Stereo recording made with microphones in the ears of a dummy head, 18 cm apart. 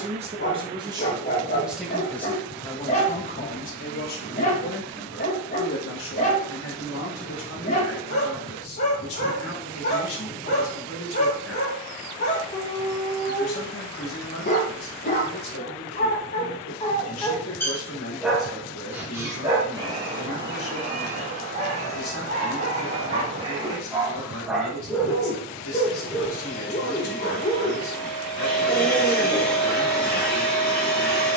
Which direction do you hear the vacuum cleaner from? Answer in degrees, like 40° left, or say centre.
centre.